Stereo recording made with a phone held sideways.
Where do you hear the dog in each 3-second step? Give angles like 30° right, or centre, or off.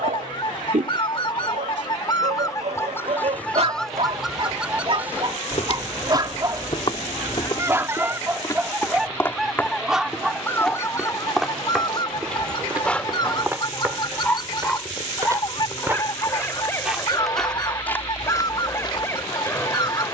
70° right, 50° right, 20° right, centre, 10° left, 20° left, 20° left.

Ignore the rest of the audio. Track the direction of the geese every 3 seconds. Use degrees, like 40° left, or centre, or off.
40° left, centre, 20° right, 20° left, 40° left, 40° left, 40° left.